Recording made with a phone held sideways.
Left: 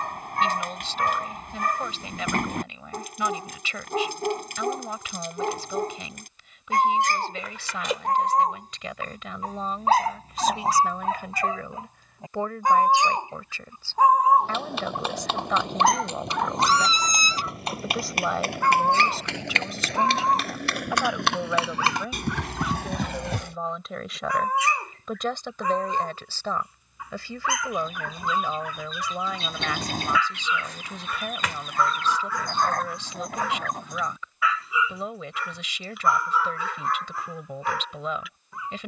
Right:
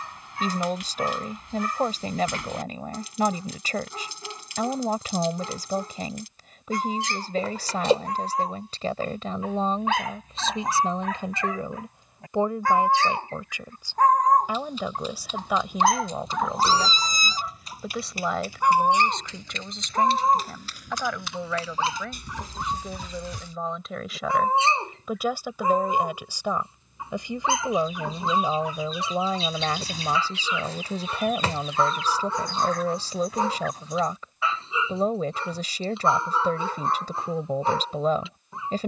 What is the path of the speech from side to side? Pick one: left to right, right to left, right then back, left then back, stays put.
left then back.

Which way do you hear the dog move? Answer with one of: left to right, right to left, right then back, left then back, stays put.
left to right.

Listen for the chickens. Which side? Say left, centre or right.
left.